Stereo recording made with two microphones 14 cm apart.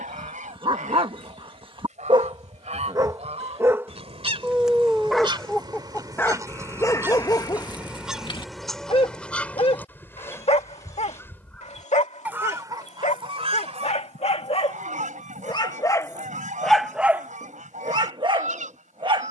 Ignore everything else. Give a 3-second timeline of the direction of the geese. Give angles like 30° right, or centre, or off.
60° right, 40° right, 10° right, 10° left, 50° right, 70° right, 70° right.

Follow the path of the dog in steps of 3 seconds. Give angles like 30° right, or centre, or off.
40° right, 10° right, 30° left, 50° left, 50° left, 10° left, 40° right.